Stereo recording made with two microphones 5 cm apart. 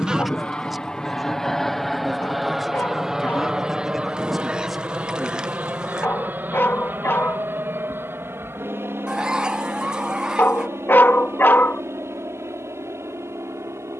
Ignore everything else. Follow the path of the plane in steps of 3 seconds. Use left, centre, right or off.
centre, right, right, right, right.